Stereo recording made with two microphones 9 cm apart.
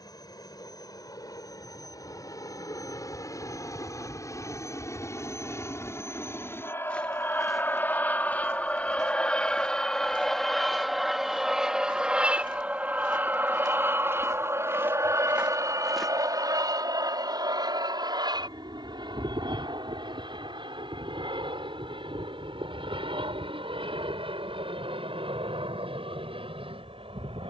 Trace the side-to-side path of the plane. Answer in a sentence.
You can hear the plane travel towards the right.